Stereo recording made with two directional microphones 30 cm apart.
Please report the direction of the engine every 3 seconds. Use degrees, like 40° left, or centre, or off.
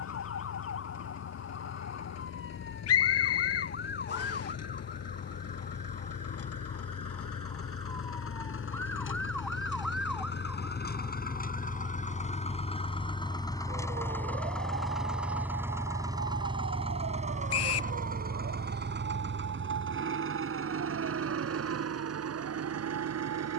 60° left, 60° left, 50° left, 30° left, 10° left, 10° right, 40° right, 50° right.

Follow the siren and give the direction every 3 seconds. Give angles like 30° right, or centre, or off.
50° left, 30° left, 20° left, centre, 30° right, 40° right, 50° right, 60° right.